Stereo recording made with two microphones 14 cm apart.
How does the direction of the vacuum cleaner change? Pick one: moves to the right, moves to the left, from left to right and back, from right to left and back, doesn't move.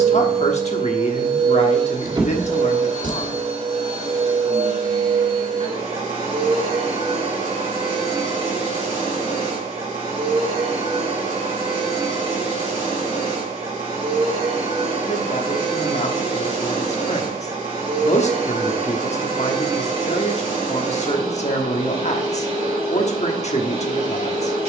doesn't move.